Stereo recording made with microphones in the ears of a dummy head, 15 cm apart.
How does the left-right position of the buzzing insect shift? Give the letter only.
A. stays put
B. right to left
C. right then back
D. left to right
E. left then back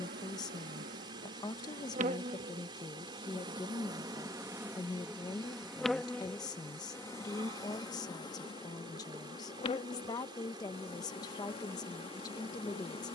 B.